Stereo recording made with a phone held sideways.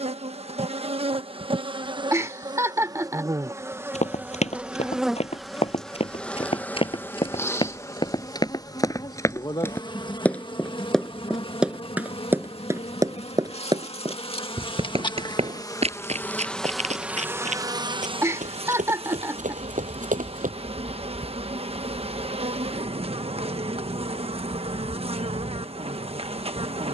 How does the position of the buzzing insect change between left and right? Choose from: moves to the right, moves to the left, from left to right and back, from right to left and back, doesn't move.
from right to left and back.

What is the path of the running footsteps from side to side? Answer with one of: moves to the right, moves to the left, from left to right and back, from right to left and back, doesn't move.
moves to the right.